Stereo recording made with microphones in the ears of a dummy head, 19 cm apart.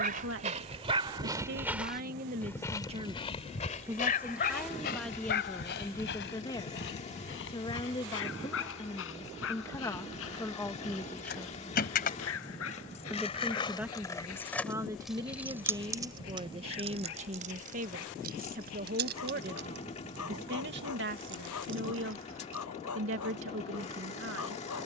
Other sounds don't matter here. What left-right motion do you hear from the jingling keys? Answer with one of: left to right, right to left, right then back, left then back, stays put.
left to right.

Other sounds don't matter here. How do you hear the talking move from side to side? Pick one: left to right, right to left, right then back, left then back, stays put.
left then back.